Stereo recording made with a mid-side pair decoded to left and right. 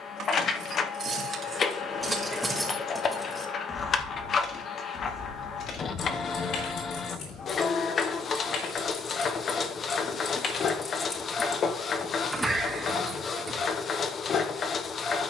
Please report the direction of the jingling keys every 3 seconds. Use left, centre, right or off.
right, left, left, left, right.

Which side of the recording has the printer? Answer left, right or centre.
left.